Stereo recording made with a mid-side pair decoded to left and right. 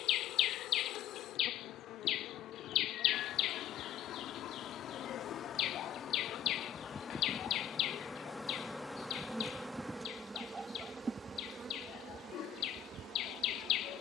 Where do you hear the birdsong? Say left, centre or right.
left.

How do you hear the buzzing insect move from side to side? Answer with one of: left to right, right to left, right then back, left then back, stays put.
left to right.